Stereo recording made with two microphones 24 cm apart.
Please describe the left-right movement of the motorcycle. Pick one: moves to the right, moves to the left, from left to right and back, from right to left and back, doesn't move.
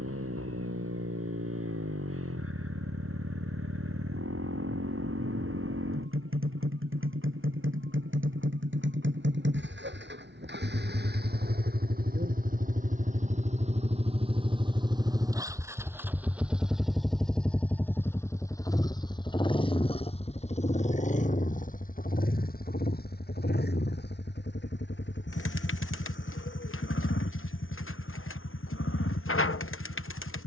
moves to the left.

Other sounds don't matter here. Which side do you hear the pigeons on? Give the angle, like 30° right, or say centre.
60° left.